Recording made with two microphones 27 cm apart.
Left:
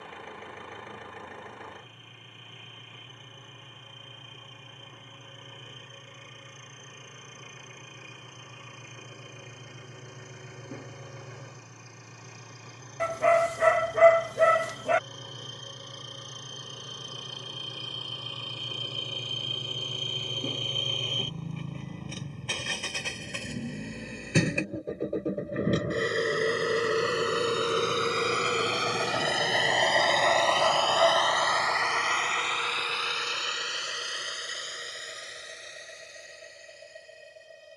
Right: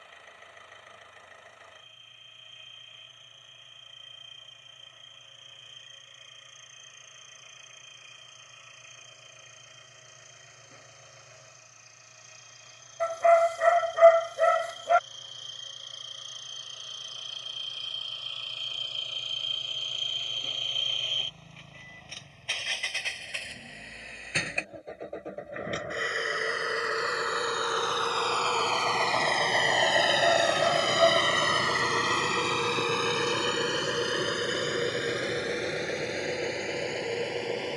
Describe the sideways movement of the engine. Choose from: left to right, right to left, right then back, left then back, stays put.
left to right.